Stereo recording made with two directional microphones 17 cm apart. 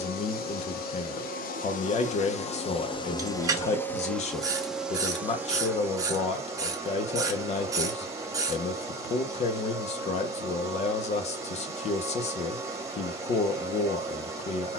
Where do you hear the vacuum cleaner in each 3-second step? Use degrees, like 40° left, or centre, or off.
50° left, centre, 20° right, 20° right, 20° right.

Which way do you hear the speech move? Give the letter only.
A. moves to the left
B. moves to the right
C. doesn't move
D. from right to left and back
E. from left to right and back
C.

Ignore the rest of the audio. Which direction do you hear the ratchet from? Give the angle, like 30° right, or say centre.
20° right.